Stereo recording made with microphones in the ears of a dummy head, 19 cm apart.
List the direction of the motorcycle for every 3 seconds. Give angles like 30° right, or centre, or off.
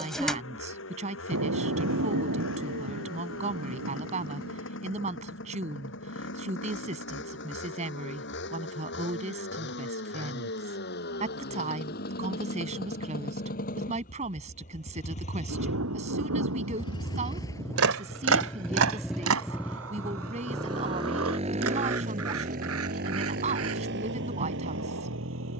60° left, 60° left, 60° left, 50° left, 40° left, 20° left, 10° right, 40° right, 60° right.